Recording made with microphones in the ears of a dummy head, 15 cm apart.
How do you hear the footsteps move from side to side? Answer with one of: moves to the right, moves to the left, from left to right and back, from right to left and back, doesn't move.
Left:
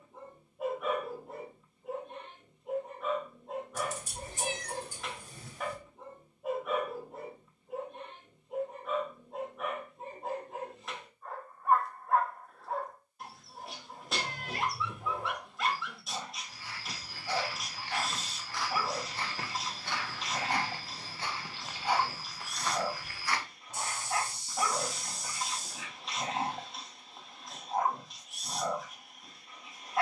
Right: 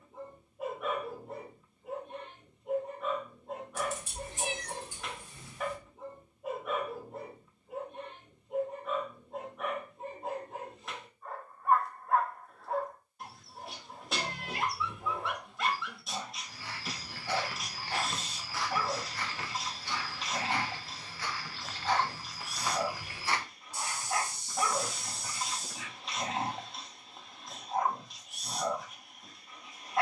from right to left and back.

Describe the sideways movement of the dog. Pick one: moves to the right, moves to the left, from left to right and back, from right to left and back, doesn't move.
doesn't move.